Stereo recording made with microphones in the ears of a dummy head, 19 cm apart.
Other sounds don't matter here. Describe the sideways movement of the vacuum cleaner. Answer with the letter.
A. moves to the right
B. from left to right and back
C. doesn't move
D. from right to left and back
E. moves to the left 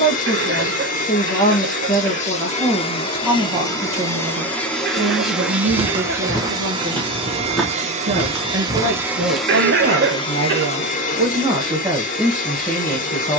B.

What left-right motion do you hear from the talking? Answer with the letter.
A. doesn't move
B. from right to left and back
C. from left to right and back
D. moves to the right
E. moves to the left
C.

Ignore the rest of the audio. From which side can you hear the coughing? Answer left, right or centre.
right.